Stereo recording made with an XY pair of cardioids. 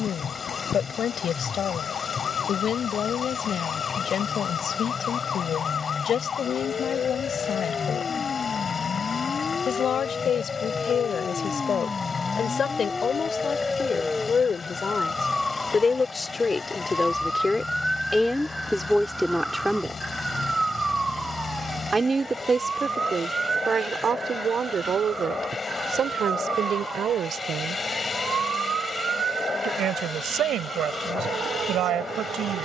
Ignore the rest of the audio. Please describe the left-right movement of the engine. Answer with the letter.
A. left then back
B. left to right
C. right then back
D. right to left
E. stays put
E.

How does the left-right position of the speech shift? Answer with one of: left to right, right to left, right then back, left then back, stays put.
left to right.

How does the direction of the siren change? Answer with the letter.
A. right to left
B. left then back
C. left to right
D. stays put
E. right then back
C.